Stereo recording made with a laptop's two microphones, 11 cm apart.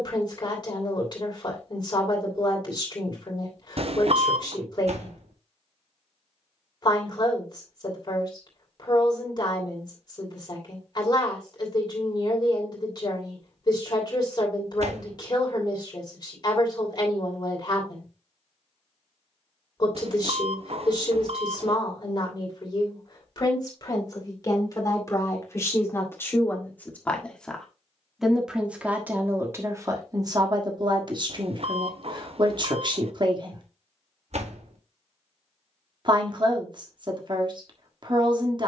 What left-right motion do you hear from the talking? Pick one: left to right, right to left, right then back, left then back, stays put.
left to right.